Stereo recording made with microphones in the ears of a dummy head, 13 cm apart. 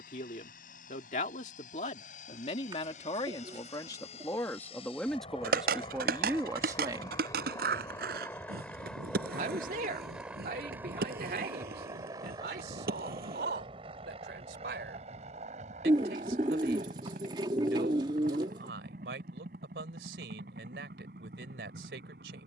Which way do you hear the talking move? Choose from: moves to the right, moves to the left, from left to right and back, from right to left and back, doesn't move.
moves to the right.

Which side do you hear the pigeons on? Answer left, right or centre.
right.